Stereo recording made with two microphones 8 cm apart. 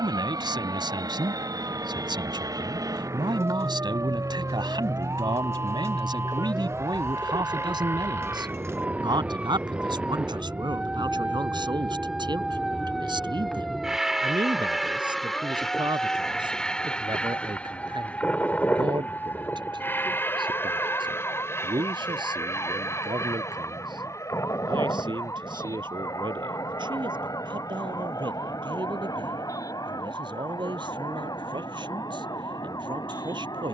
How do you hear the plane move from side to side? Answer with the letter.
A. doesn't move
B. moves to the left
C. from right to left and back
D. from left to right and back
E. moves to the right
B.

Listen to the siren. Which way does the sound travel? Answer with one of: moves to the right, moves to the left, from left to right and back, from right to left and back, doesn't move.
moves to the left.